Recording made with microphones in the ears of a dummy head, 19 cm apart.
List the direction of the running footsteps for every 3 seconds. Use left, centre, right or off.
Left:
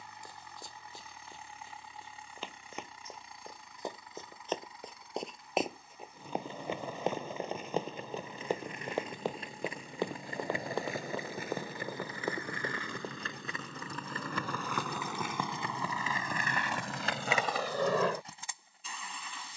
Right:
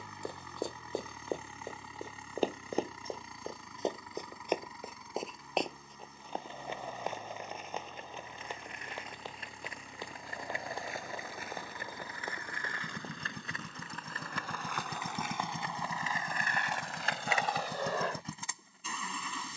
right, centre, left, left, left, off, off.